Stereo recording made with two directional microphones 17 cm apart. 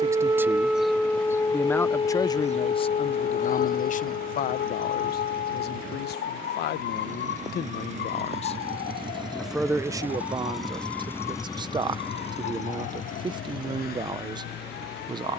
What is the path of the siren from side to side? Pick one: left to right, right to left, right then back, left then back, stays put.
right to left.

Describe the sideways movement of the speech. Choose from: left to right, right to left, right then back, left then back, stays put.
left then back.